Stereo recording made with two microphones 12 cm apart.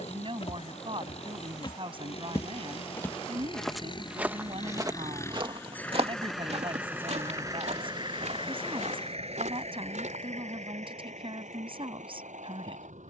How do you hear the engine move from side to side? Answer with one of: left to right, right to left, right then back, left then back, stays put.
left to right.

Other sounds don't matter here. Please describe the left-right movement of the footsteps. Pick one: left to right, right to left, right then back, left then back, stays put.
left to right.